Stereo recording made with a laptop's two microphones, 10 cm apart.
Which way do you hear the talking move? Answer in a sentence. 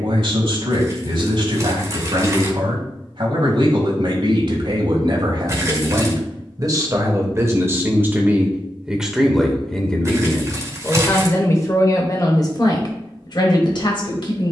You can hear the talking move to the left.